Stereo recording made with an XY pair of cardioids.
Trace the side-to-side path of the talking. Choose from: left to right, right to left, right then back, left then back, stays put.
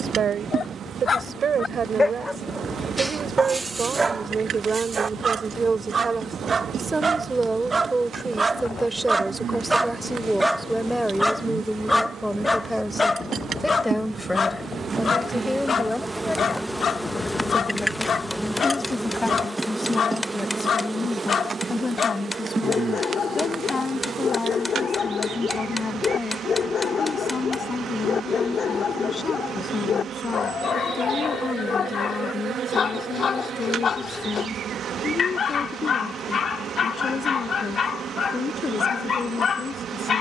right to left.